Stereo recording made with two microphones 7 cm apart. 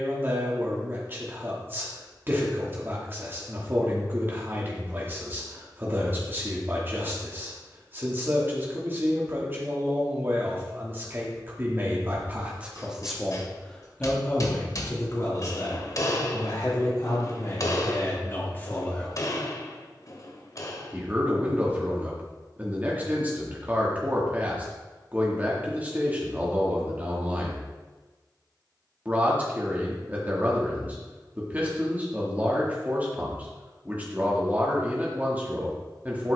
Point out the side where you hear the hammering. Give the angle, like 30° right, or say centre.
50° left.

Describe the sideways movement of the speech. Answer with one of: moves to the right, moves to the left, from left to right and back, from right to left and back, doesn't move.
from right to left and back.